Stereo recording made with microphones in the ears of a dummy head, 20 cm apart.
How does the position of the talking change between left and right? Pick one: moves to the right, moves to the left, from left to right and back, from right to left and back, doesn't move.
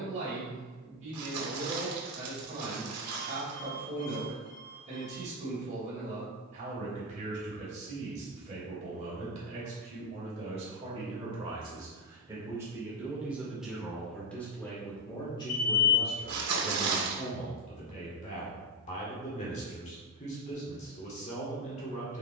moves to the left.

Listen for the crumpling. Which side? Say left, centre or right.
right.